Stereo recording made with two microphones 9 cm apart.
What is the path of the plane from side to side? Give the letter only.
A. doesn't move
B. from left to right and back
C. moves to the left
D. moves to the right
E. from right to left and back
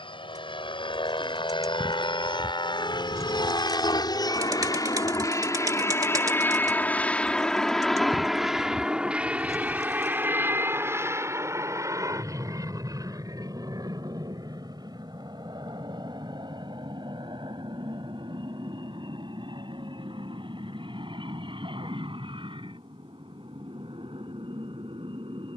D.